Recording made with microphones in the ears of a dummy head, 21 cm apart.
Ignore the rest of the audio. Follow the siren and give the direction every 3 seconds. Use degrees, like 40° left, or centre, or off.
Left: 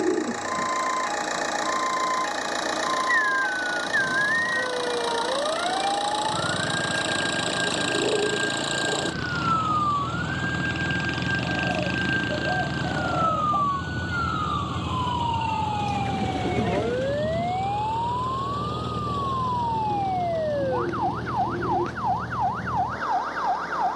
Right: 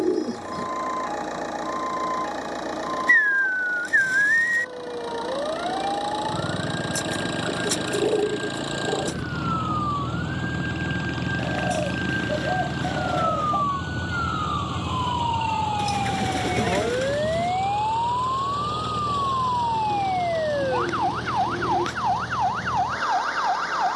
50° left, 50° left, 40° left, 30° left, 10° left, 20° right, 50° right, 70° right.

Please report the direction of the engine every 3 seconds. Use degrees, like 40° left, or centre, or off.
50° left, 40° left, 30° left, 20° left, centre, 20° right, 30° right, 50° right.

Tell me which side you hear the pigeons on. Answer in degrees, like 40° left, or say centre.
70° right.